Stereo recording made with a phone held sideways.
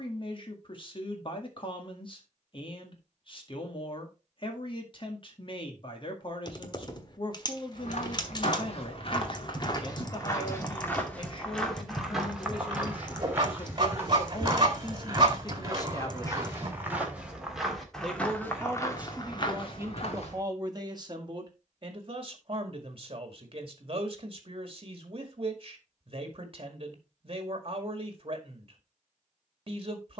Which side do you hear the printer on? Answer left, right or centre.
right.